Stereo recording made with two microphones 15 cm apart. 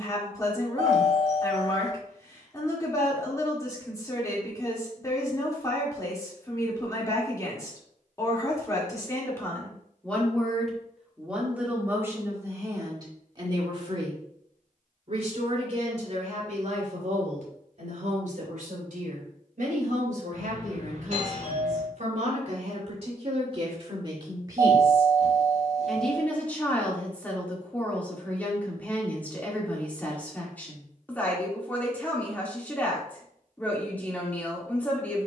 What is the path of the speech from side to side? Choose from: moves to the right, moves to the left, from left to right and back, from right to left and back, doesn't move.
from left to right and back.